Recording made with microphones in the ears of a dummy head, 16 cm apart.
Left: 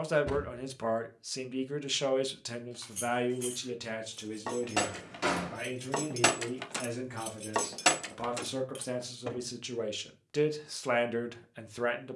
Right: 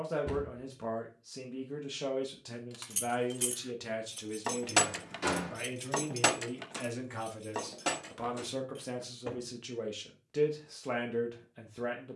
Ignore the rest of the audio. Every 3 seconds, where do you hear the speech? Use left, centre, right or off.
left, centre, centre, left.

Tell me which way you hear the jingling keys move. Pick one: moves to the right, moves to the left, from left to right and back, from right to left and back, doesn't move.
moves to the left.